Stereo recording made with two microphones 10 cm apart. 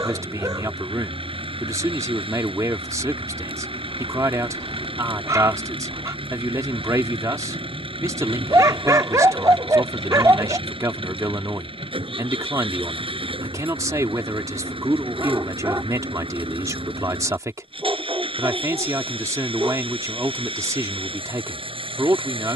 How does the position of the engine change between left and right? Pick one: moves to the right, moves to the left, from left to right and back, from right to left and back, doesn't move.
doesn't move.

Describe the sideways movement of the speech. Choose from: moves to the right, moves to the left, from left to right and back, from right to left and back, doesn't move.
doesn't move.